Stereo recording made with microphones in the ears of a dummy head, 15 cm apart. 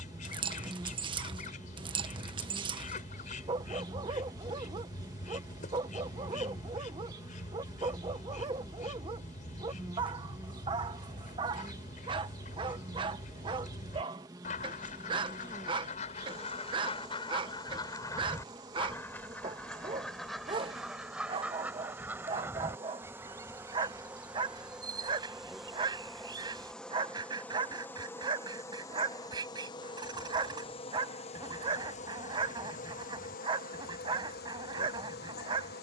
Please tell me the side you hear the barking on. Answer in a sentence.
You can hear the barking on the right.